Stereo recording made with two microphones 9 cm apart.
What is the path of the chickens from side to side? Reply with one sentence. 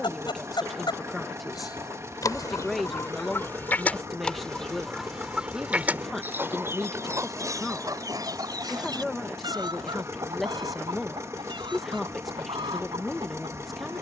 You can hear the chickens travel towards the right.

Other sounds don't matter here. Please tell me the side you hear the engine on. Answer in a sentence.
In this clip you hear the engine on the right.